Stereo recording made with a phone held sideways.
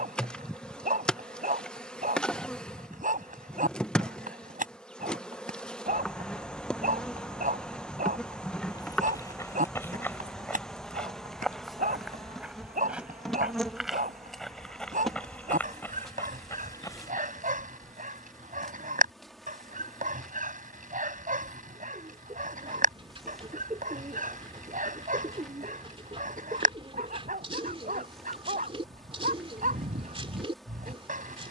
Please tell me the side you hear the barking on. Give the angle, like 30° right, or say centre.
70° right.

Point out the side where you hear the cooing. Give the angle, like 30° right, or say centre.
40° right.